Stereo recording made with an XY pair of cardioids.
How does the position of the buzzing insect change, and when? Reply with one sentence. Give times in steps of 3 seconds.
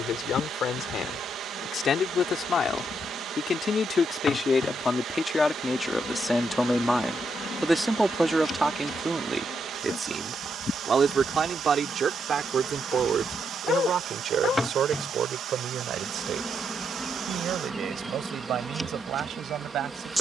In this clip you hear the buzzing insect on the left from 0 s and in the centre from 15 s.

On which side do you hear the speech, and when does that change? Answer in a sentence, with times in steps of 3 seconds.
In this clip you hear the speech on the left from 0 s, in the centre from 6 s and on the right from 9 s.